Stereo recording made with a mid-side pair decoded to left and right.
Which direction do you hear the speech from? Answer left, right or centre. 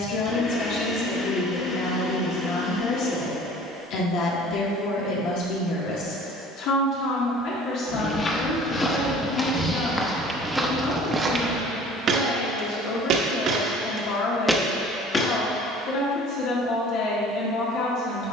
left.